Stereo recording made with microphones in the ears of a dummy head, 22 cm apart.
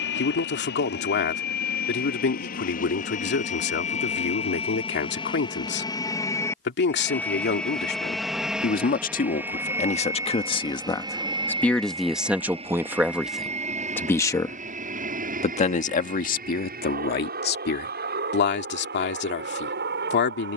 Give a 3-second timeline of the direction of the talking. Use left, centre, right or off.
left, left, left, left, centre, left, left.